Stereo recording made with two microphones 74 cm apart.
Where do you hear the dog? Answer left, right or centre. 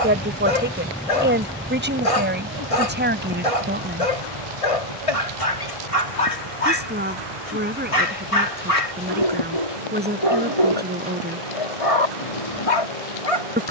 left.